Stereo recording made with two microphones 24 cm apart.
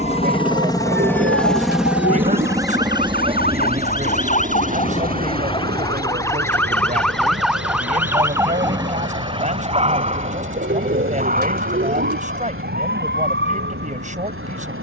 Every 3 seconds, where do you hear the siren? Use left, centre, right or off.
left, left, centre, right, right.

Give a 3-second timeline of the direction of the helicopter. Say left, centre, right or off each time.
centre, right, right, right, right.